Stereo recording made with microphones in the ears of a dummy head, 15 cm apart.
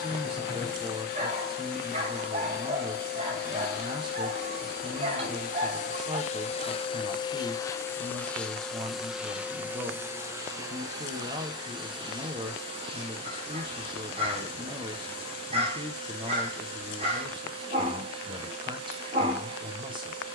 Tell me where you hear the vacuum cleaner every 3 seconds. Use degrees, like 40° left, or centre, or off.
60° left, 60° left, 20° left, 20° right, 30° right, 30° right, 30° right.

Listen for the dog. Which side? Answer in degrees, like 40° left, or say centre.
40° right.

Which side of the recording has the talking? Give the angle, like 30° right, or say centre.
30° right.